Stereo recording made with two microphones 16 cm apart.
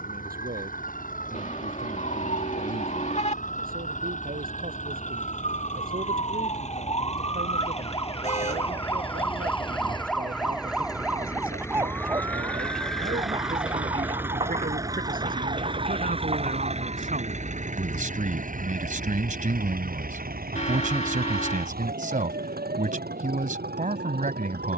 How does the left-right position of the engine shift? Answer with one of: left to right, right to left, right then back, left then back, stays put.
left to right.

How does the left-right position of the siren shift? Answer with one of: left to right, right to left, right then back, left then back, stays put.
left to right.